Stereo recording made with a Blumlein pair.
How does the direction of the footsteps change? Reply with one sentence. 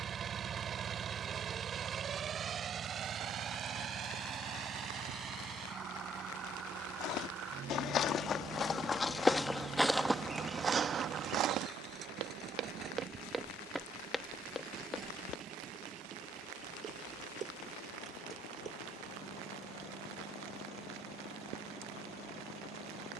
You can hear the footsteps go right and come back.